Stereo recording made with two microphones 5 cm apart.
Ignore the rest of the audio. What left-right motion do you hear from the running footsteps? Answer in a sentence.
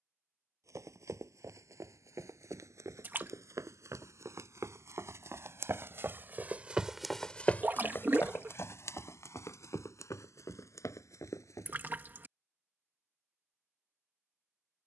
In this clip you hear the running footsteps travel towards the left.